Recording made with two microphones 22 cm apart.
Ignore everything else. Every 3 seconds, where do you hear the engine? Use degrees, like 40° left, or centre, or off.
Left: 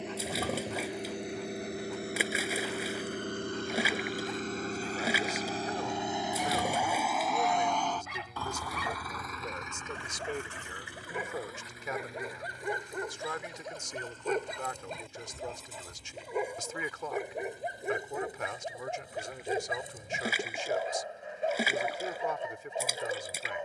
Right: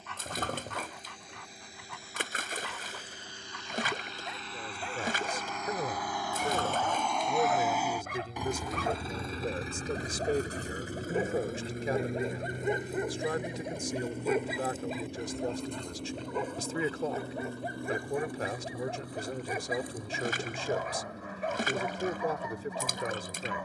70° left, 50° left, centre, 40° right, 60° right, 60° right, 70° right, 70° right.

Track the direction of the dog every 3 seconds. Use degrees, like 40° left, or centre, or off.
70° right, 70° right, 50° right, 40° right, 20° right, 10° left, 20° left, 30° left.